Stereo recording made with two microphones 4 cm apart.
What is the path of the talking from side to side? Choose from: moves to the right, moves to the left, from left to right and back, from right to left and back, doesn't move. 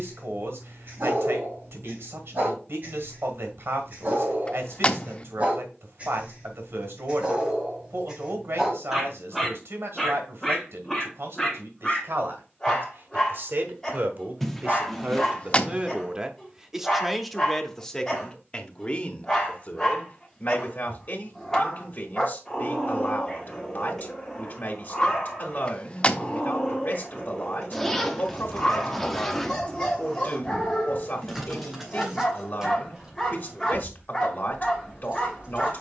moves to the left.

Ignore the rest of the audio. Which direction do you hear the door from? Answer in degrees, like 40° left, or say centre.
30° left.